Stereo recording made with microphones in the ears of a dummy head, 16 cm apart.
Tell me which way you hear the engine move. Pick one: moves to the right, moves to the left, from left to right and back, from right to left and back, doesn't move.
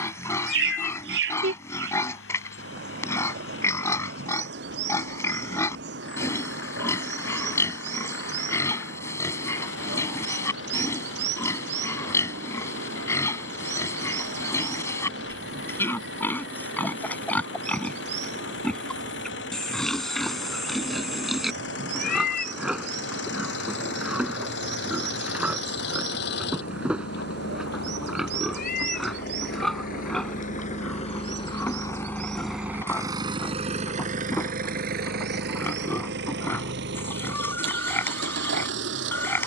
moves to the right.